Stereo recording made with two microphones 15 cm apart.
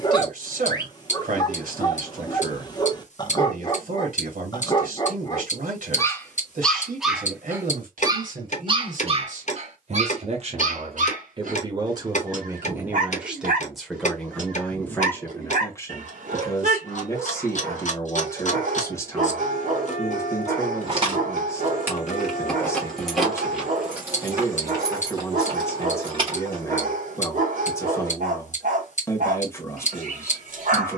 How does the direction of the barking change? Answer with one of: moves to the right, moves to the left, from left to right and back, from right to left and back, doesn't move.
moves to the right.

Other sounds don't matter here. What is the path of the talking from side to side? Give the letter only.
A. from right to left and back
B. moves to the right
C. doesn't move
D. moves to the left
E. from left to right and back
D.